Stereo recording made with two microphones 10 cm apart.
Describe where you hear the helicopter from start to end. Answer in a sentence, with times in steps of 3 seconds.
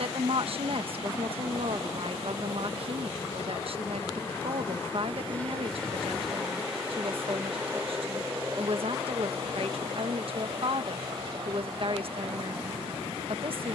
You can hear the helicopter on the left from 0 s, in the centre from 6 s and on the right from 9 s.